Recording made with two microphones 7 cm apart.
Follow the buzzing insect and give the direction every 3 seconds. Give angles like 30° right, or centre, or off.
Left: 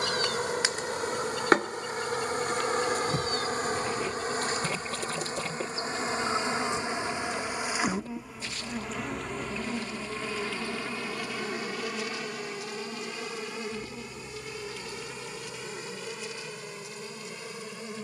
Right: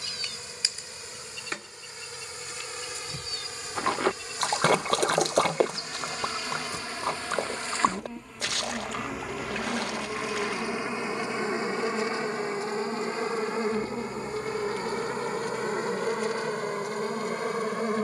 60° left, 40° left, 20° left, 20° right, 40° right, 50° right.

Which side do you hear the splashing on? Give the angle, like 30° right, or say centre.
70° right.